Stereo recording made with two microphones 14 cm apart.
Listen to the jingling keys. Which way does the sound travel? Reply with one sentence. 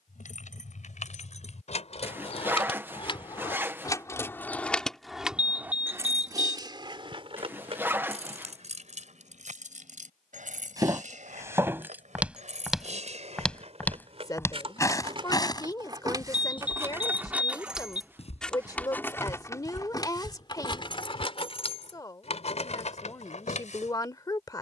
In this clip you hear the jingling keys move from left to right and back again.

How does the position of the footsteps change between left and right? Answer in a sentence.
You can hear the footsteps go from the right side to the left.